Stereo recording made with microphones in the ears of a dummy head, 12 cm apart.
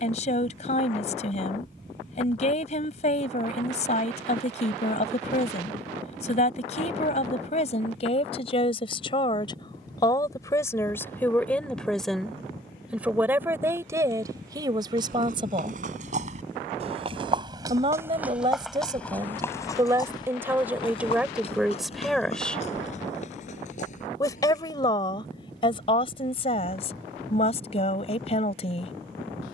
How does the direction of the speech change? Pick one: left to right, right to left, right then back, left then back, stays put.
right then back.